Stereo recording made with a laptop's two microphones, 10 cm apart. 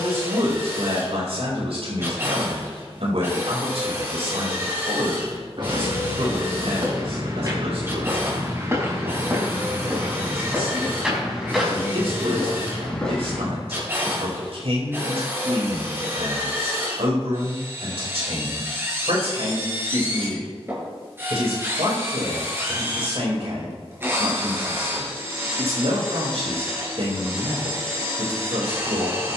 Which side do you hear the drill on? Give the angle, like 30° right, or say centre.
20° right.